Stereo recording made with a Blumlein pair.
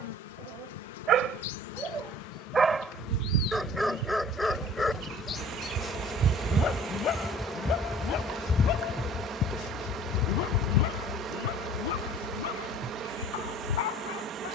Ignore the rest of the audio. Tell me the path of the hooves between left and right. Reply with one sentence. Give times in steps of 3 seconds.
You can hear the hooves not at all from 0 s, on the right from 3 s, in the centre from 6 s and on the left from 9 s.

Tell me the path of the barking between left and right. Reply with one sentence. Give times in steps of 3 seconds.
In this clip you hear the barking on the right from 0 s, in the centre from 3 s and on the left from 6 s.